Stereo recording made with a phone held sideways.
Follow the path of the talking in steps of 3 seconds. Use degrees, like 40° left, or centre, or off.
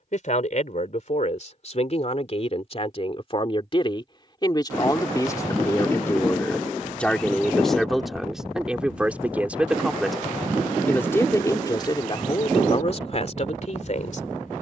50° left, 30° left, centre, 10° left, 50° left.